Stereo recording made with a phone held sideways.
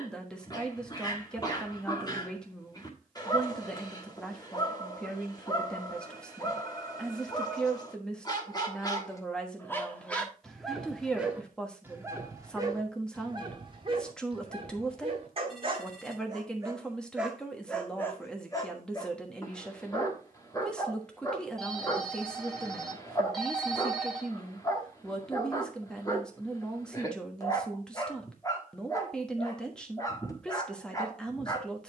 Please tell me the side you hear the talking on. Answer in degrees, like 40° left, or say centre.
10° left.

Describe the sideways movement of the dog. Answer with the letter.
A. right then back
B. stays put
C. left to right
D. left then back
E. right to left
A.